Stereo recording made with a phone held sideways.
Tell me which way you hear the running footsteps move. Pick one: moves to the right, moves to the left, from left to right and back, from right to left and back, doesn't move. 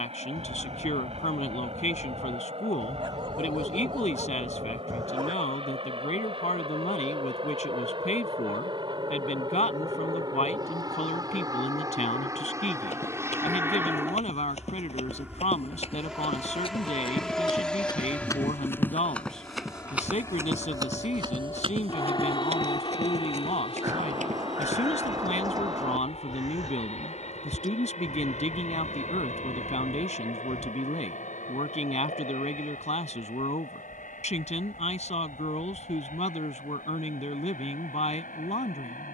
moves to the right.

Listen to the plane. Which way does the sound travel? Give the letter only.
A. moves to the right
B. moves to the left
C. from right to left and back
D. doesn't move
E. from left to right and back
B.